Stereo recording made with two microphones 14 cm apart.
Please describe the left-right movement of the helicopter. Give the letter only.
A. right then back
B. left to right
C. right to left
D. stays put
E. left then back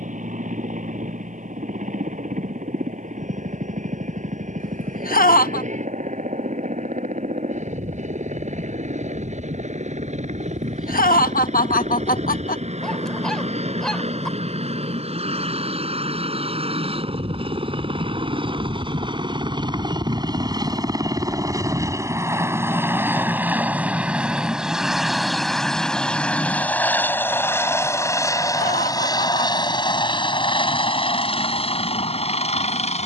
C.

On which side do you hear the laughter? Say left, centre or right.
left.